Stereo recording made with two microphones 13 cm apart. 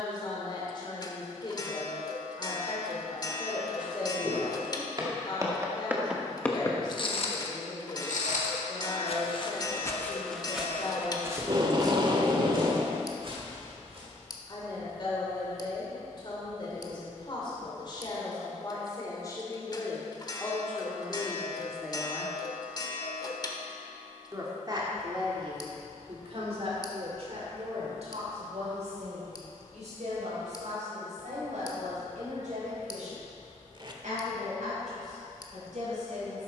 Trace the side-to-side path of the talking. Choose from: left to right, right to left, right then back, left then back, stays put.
left to right.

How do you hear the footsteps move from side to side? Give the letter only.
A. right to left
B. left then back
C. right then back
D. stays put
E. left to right
B.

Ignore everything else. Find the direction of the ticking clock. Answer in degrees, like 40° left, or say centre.
30° left.